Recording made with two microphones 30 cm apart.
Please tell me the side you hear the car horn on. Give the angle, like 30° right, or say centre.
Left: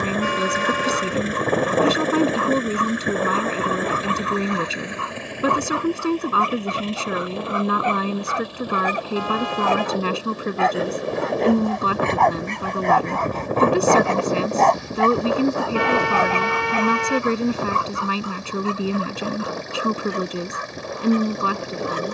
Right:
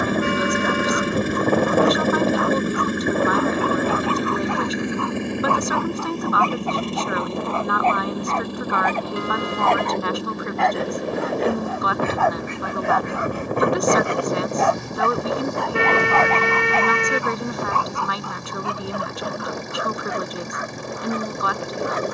30° right.